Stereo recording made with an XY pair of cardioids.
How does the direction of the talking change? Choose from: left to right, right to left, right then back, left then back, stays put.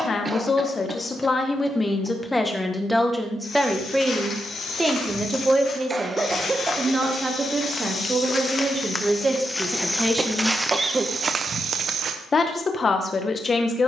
right then back.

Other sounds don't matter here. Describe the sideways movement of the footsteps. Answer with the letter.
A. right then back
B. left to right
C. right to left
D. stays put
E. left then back
B.